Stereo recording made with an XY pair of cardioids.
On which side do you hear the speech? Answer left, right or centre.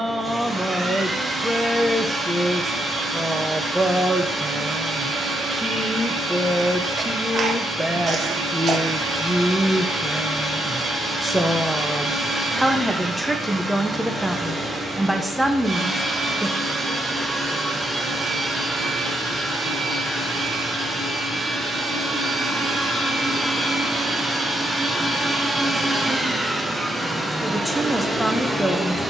centre.